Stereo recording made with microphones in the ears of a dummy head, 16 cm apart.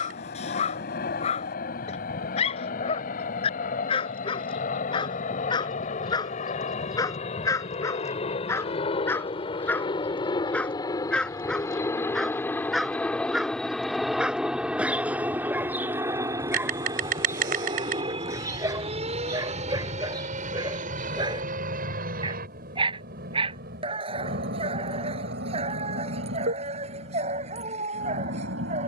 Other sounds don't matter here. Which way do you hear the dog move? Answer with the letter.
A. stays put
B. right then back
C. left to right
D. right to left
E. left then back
C.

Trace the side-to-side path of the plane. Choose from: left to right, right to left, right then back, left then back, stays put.
left to right.